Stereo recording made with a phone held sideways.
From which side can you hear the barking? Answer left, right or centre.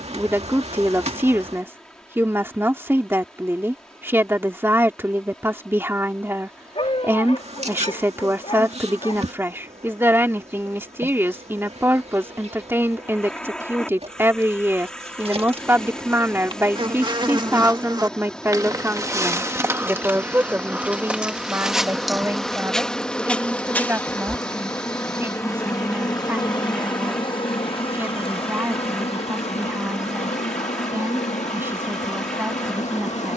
left.